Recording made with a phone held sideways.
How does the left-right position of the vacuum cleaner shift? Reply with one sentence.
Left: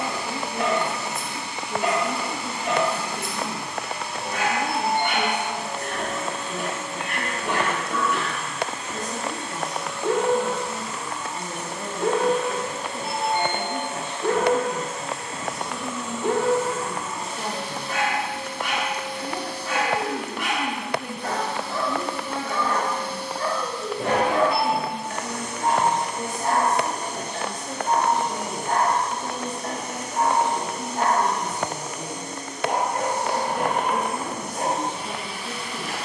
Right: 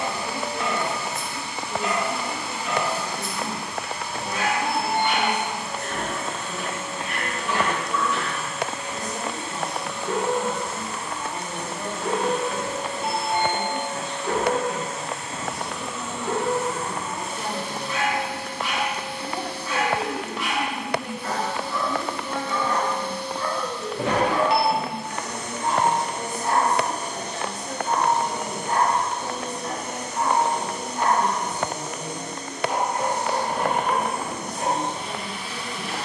You can hear the vacuum cleaner move from left to right and back again.